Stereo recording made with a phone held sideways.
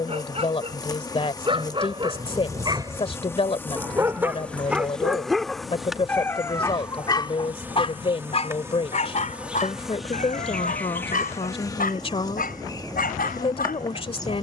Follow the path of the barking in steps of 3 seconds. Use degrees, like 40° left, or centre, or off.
30° right, 10° right, 30° left, 70° left, 80° left.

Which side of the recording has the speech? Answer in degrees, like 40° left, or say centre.
40° left.